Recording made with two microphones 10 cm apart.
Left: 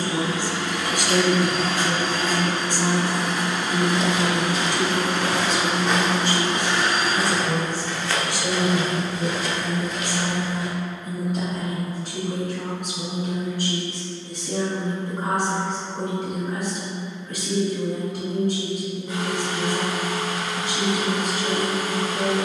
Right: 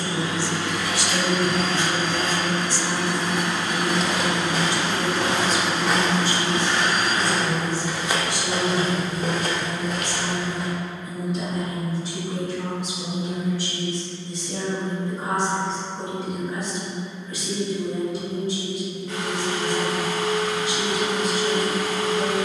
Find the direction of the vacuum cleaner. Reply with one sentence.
In this clip you hear the vacuum cleaner in the centre.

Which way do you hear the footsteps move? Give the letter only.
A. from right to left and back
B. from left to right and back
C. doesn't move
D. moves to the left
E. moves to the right
A.